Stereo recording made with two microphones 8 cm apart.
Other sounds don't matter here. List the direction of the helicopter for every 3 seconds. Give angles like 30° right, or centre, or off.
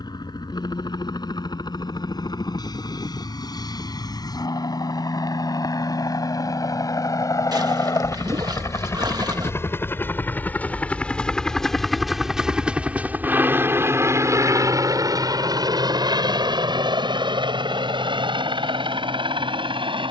60° left, 50° left, 40° left, 20° left, 20° right, 60° right, 70° right.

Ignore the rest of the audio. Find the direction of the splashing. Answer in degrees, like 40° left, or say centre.
50° right.